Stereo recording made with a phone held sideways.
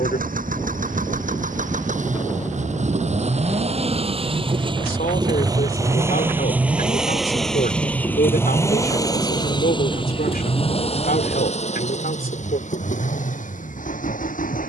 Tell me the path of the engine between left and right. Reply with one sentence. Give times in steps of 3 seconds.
In this clip you hear the engine on the right from 0 s, in the centre from 6 s and on the left from 9 s.